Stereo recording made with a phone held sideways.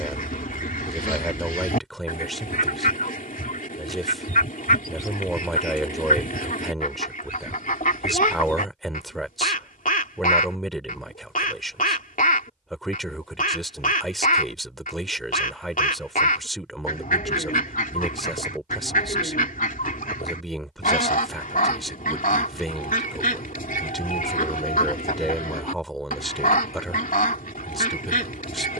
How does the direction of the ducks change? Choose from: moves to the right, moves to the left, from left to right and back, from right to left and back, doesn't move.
doesn't move.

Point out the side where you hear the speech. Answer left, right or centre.
centre.